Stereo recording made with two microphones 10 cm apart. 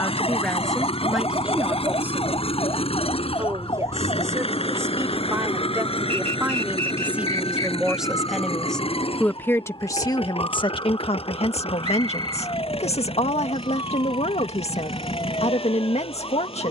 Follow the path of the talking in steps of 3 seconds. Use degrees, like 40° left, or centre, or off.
centre, 30° right, 10° right, 50° left, 70° left, 70° left.